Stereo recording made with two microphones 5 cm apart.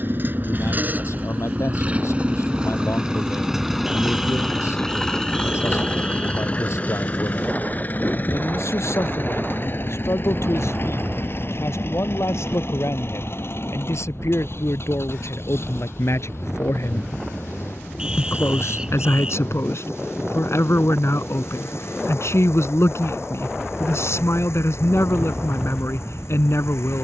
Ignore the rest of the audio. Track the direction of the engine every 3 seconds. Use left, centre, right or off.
right, centre, left, left, left, left, left, left, left.